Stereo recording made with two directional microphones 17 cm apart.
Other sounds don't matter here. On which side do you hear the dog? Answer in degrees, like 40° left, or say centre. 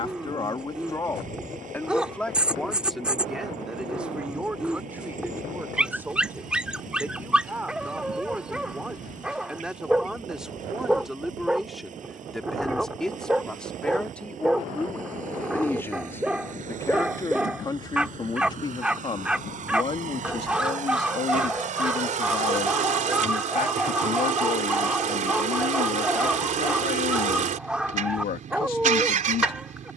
10° right.